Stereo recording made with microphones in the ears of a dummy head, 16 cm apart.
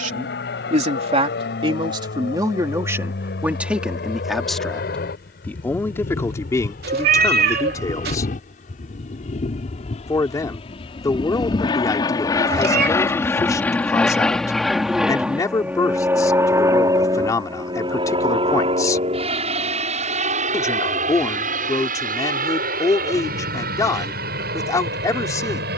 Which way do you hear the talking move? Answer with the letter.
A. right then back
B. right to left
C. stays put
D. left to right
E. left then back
B.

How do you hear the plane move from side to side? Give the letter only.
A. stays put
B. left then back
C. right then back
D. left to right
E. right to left
D.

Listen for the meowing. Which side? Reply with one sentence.
You can hear the meowing on the right.